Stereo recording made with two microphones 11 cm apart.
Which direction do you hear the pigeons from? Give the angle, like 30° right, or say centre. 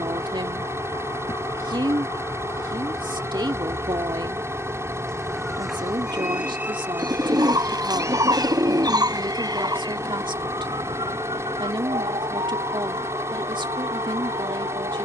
40° right.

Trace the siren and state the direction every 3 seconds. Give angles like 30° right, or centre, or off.
40° left, 10° left, 20° right, 40° right, 60° right.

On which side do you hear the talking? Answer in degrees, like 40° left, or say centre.
50° right.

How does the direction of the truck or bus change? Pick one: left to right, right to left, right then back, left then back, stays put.
stays put.